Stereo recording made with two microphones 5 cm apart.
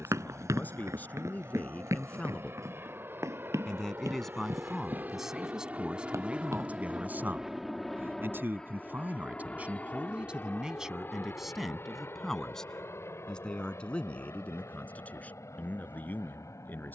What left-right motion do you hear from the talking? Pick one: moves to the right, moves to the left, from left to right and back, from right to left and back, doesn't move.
from left to right and back.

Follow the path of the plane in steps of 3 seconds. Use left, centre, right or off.
right, right, centre, left, left, left.